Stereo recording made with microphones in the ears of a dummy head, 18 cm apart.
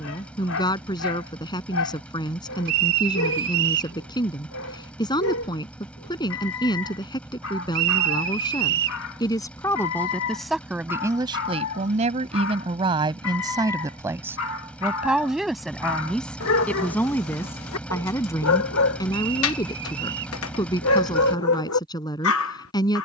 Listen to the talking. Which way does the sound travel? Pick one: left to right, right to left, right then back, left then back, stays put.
right then back.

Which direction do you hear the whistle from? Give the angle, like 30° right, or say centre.
70° right.